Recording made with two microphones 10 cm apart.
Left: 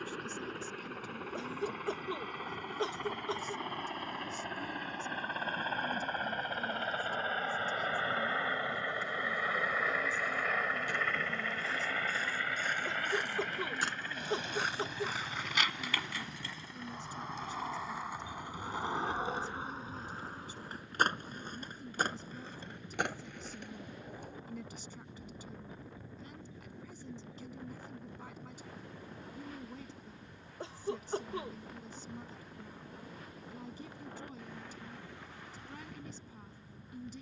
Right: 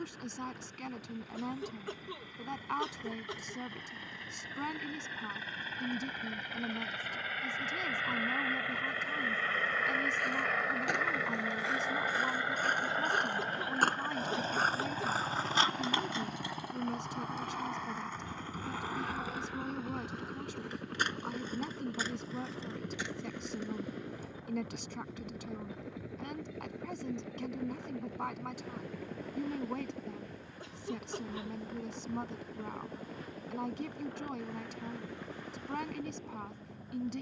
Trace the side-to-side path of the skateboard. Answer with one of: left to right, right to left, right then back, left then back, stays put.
right to left.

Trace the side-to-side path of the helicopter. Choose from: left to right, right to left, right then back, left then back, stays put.
left to right.